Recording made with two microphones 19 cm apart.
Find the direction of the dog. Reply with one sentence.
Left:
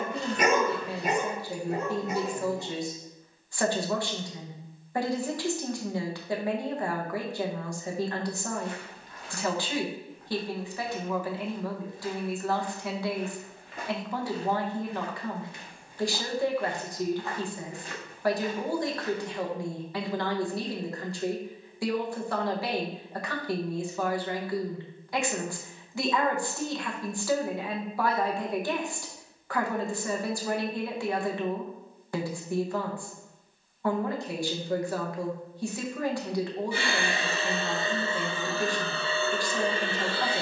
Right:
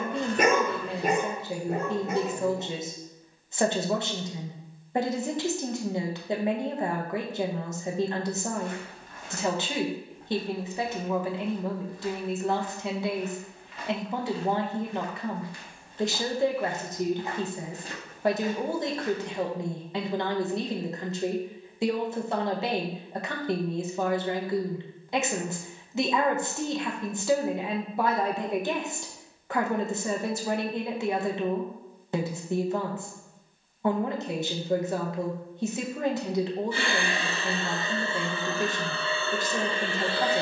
In this clip you hear the dog on the right.